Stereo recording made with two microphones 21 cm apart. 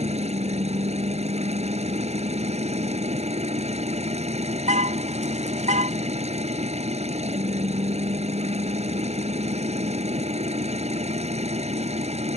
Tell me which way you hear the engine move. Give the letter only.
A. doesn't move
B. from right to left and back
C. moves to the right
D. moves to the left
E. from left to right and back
A.